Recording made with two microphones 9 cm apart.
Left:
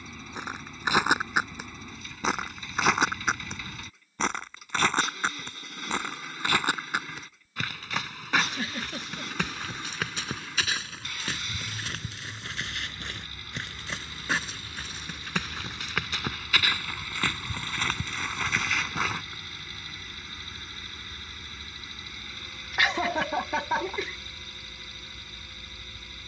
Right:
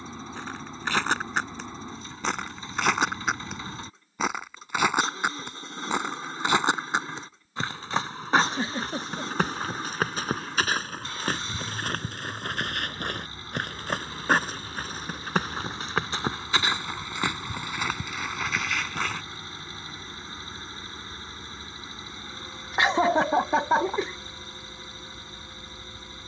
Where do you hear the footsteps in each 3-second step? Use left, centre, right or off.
centre, centre, right, right, right, right, centre, off, off.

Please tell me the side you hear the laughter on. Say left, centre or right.
right.